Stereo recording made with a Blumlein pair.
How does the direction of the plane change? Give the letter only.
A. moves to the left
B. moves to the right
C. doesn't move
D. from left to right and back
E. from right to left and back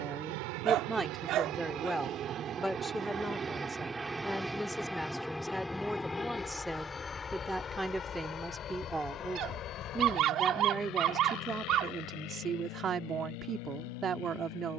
A.